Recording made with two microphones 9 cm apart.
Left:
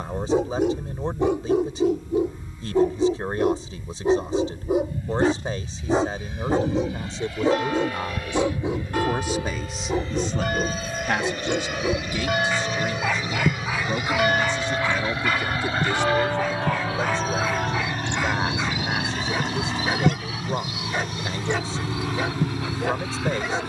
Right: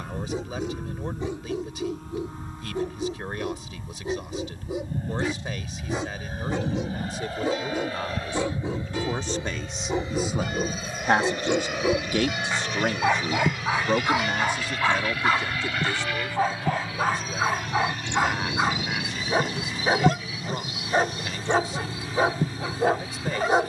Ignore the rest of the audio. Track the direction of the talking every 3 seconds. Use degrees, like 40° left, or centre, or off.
30° left, 30° left, 30° left, 10° right, 40° right, 20° left, 30° left, 30° left.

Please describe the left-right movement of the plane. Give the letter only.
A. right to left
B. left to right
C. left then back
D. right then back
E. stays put
A.